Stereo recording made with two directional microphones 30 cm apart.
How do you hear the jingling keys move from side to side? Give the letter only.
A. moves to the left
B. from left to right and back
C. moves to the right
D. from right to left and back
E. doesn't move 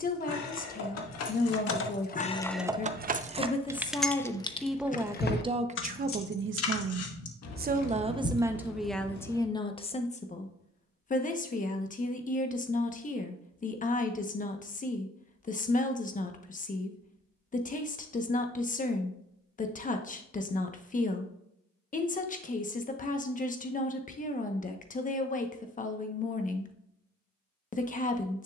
B.